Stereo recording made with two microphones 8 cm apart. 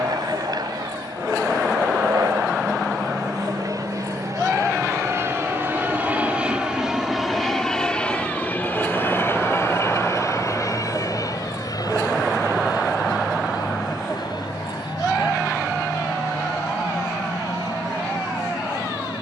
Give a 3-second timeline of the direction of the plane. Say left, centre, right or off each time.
right, right, centre, left, left, left, left.